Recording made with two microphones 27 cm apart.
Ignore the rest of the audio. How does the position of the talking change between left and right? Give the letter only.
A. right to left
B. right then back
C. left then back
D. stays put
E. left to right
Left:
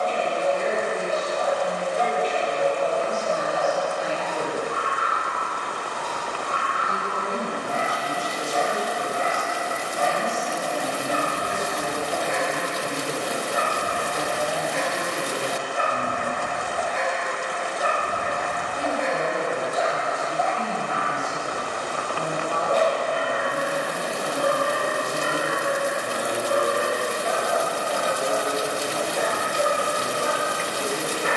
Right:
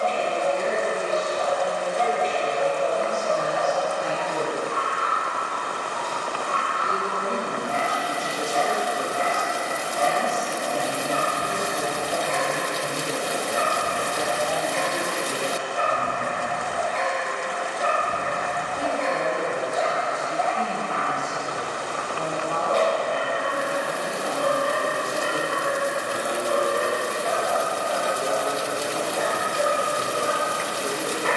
B.